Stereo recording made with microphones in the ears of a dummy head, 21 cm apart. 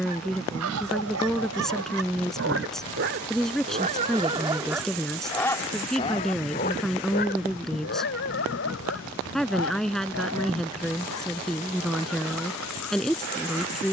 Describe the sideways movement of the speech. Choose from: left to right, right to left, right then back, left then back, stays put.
stays put.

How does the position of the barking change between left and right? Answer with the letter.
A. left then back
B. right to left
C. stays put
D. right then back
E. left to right
B.